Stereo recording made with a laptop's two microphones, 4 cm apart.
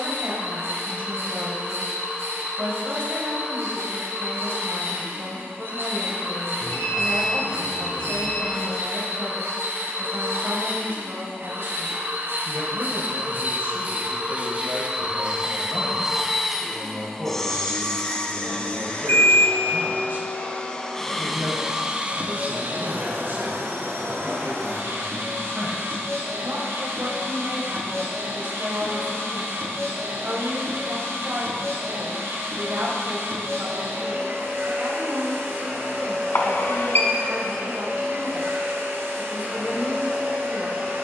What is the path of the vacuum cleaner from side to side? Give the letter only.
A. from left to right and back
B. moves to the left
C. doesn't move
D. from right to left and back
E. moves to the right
D.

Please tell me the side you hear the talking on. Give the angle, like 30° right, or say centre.
60° right.